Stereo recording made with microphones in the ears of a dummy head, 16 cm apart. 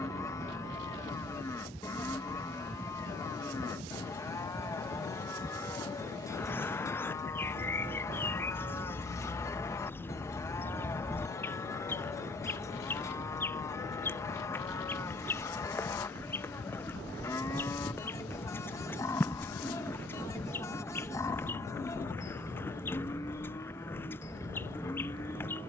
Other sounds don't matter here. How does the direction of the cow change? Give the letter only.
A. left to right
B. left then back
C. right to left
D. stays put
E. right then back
D.